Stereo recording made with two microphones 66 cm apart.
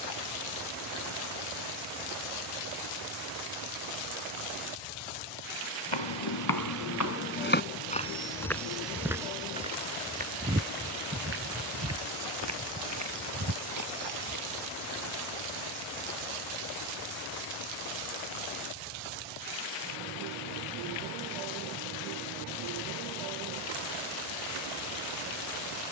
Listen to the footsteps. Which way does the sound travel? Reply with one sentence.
In this clip you hear the footsteps travel towards the right.